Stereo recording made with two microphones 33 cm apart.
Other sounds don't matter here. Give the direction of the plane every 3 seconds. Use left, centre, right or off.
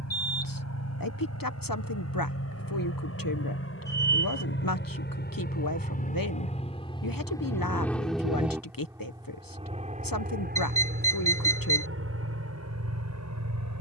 left, left, centre, right, right.